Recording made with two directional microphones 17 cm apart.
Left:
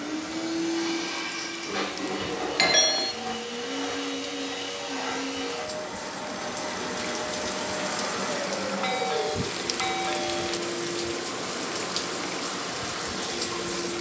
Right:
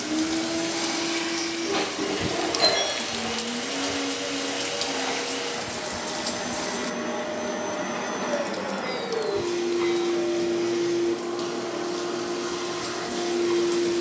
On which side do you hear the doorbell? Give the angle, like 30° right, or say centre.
60° left.